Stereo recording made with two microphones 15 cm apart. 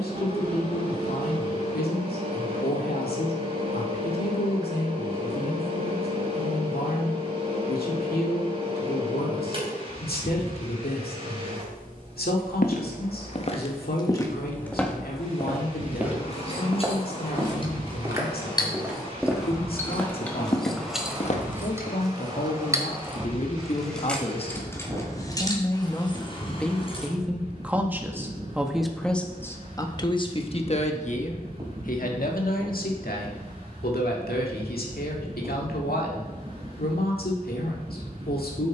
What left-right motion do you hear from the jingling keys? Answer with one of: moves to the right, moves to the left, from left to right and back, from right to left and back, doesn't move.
from left to right and back.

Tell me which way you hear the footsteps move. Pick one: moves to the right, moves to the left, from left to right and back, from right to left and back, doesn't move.
from left to right and back.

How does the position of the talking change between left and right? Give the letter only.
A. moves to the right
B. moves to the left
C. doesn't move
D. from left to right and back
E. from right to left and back
D.